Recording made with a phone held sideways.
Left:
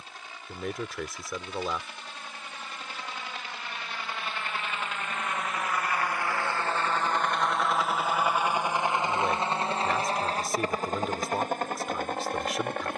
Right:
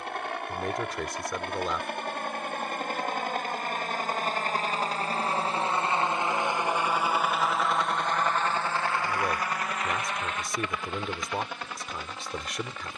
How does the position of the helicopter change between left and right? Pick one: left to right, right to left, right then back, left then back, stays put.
right to left.